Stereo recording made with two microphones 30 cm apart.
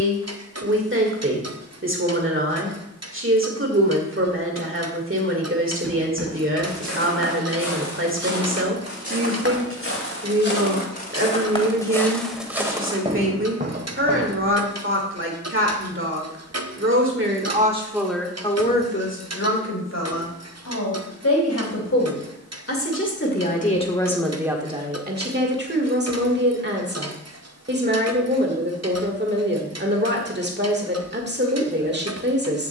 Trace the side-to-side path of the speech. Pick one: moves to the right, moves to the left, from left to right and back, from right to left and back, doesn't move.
from right to left and back.